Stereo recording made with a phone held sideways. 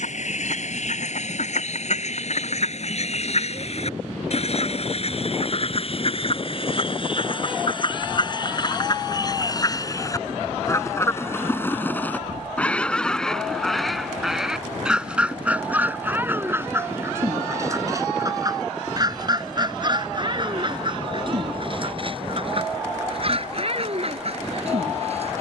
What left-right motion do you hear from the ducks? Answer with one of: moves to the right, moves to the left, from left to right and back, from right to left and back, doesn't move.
moves to the right.